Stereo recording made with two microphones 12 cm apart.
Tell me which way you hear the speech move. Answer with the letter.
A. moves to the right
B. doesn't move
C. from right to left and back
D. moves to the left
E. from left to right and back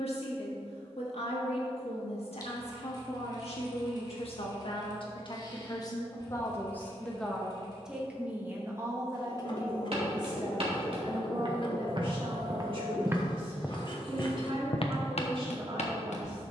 A.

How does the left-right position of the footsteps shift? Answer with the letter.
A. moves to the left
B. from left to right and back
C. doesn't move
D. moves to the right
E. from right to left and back
A.